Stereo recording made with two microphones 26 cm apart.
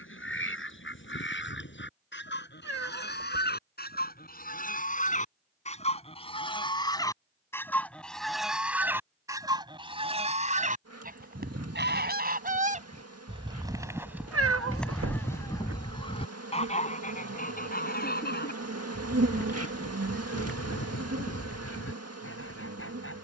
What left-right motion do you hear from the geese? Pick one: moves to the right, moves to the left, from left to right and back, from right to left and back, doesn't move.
from left to right and back.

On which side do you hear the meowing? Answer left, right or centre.
right.